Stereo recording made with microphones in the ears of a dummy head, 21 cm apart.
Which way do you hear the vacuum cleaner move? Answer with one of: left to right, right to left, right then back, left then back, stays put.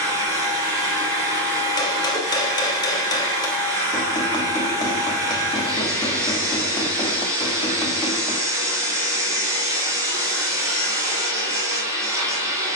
stays put.